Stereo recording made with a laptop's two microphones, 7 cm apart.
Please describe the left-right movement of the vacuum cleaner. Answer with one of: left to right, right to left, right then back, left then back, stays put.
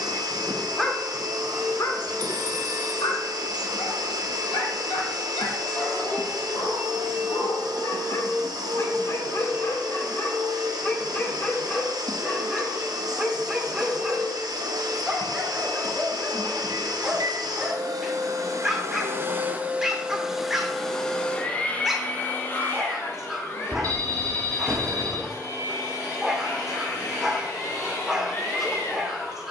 right to left.